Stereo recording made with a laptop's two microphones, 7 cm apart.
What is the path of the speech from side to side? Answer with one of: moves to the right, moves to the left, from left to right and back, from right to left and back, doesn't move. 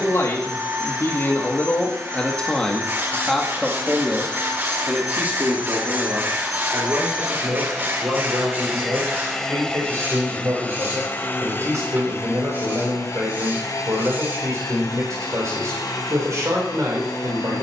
moves to the right.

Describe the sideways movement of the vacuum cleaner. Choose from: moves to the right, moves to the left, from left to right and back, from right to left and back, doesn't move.
moves to the left.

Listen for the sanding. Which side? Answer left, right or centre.
right.